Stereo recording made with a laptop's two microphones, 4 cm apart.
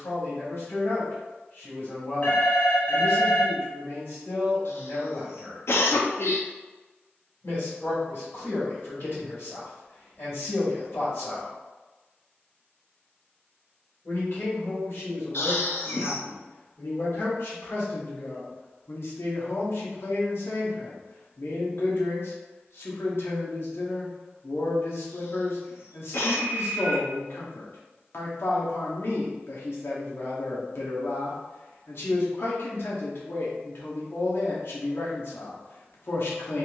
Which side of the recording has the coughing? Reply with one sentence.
You can hear the coughing on the left.